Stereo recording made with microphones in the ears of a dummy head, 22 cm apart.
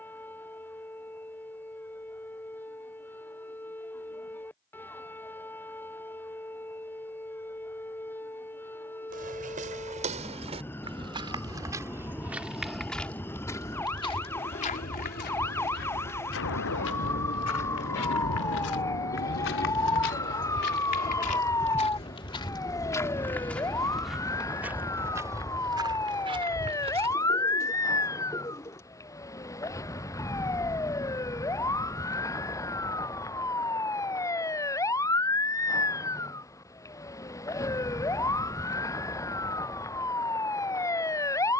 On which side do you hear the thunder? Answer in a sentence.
In this clip you hear the thunder on the left.